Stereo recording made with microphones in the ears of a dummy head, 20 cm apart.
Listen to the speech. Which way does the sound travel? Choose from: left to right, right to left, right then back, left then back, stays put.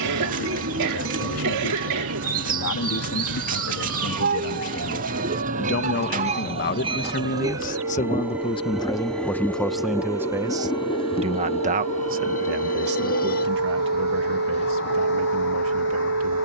left to right.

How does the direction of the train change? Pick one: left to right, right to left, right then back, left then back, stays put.
right to left.